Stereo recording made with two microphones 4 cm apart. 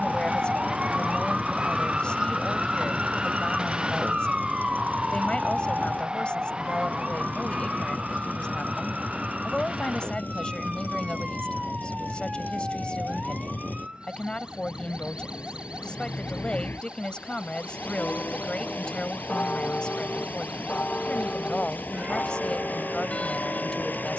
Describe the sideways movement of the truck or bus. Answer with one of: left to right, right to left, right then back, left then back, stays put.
stays put.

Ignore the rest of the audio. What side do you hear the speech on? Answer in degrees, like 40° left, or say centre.
20° left.